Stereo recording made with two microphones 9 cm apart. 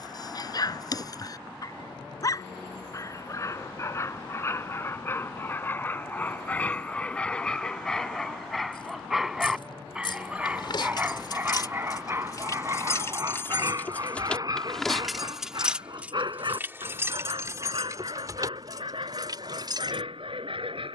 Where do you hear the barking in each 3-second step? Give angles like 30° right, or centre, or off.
40° left, 30° left, 10° left, 10° right, 40° right, 50° right, 60° right.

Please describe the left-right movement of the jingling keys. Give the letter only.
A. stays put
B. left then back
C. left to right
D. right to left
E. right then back
C.